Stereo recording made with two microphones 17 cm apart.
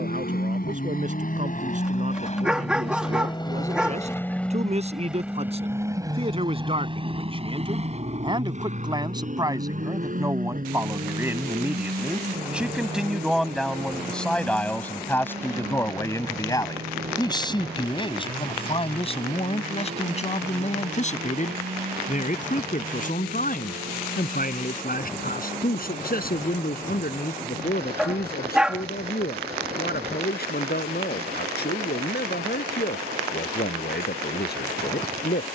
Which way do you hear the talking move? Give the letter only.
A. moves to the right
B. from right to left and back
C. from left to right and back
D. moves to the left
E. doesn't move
D.